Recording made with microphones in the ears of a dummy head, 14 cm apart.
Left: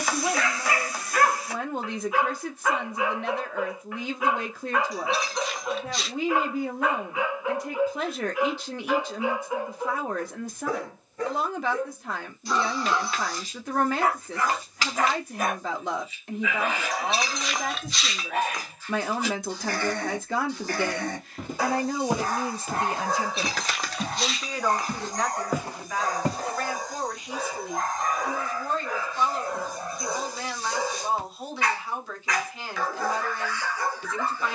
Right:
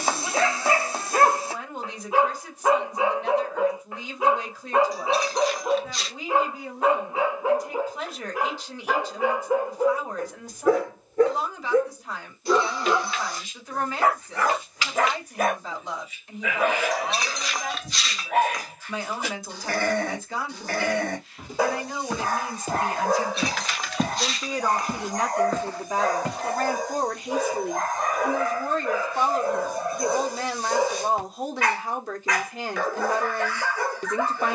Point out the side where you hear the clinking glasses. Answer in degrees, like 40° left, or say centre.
centre.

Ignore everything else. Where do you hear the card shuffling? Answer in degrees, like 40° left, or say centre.
30° left.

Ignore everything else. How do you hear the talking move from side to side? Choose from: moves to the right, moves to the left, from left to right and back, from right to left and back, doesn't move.
moves to the right.